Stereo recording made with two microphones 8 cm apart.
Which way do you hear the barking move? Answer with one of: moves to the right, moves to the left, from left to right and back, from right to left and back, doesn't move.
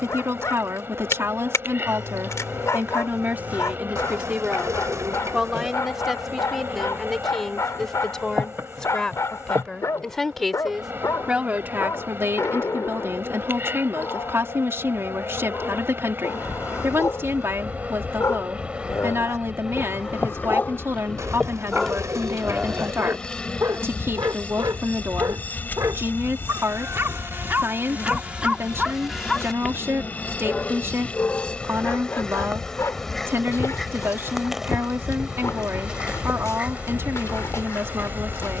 from left to right and back.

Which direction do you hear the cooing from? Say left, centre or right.
right.